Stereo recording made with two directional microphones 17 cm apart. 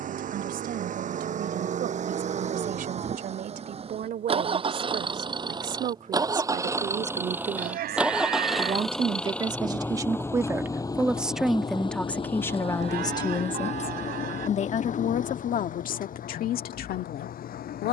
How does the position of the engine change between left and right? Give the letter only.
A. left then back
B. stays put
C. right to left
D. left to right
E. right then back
C.